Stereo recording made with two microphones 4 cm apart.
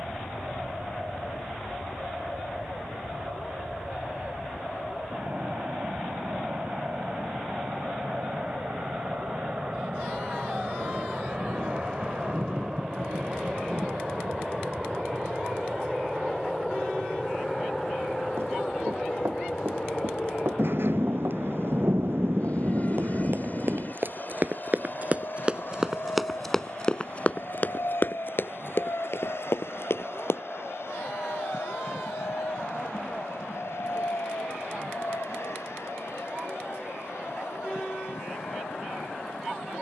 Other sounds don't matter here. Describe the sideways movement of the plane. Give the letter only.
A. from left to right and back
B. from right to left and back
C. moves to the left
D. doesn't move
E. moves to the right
C.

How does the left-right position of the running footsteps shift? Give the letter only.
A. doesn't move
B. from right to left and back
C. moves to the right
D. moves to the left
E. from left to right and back
D.